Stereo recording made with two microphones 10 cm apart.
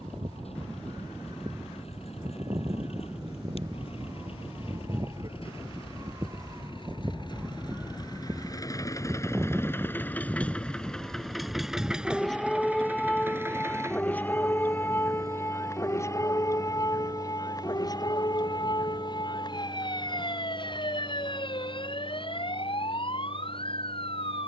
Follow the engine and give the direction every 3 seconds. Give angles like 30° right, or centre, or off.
70° left, 60° left, 40° left, 10° left, 20° right, 40° right, 50° right, 60° right.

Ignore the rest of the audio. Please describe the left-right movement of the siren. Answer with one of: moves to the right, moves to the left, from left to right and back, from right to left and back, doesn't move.
moves to the left.